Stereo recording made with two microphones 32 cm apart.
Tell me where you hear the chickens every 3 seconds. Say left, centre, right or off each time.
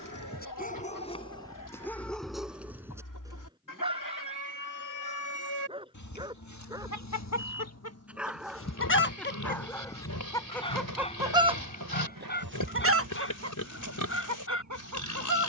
left, left, left, centre, right.